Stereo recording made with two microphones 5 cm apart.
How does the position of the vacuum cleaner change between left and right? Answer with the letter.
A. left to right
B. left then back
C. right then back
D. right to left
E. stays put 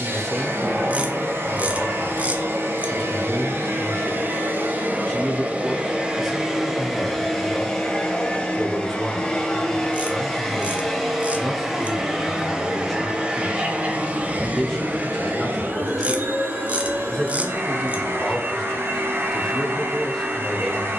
B.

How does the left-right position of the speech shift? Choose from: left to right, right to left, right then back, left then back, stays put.
stays put.